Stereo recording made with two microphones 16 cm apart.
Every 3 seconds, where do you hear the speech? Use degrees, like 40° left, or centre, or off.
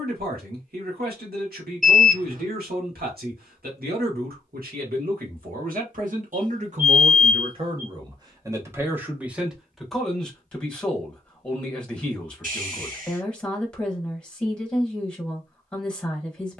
80° right, 70° right, 40° right, centre, 10° left, 10° left.